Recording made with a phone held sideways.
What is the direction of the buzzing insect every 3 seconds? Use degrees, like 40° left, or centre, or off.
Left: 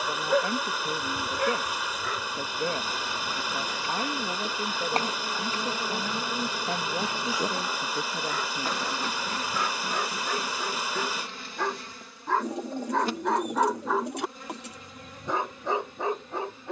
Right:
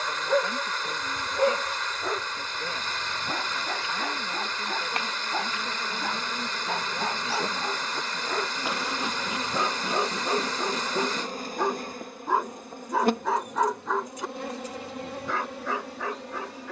50° left, 40° left, 10° left, 30° right, 60° right, 70° right.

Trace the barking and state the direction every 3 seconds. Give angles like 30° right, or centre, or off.
30° right, 60° right, 50° right, 30° right, centre, 20° left.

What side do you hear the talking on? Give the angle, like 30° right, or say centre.
40° left.